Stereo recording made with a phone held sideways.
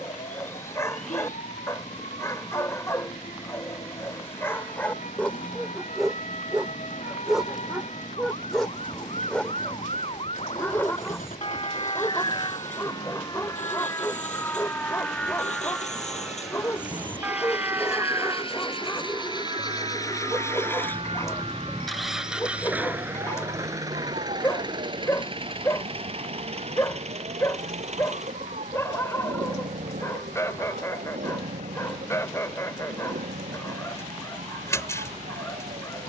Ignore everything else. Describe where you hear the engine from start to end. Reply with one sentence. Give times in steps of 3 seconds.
In this clip you hear the engine on the left from 0 s, in the centre from 21 s and on the right from 24 s.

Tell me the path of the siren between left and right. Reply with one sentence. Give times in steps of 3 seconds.
You can hear the siren on the left from 0 s, in the centre from 15 s and on the right from 18 s.